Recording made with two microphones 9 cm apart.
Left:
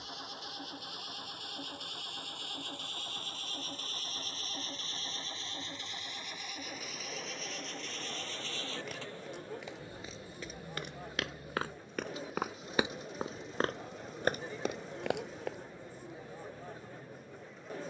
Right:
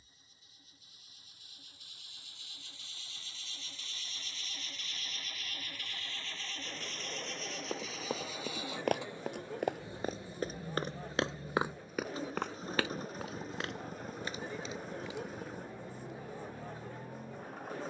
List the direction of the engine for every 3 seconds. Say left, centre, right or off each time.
left, left, centre, right, right, right.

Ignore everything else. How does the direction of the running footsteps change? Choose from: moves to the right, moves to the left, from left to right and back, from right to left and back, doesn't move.
moves to the left.